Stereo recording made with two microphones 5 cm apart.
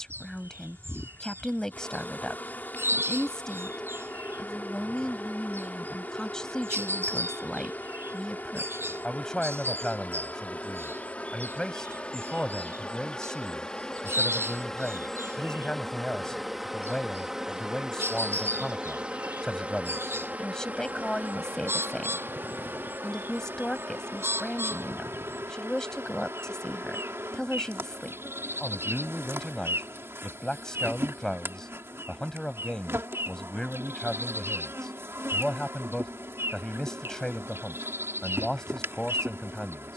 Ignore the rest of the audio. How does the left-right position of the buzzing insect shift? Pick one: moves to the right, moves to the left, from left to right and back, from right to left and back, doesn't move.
moves to the right.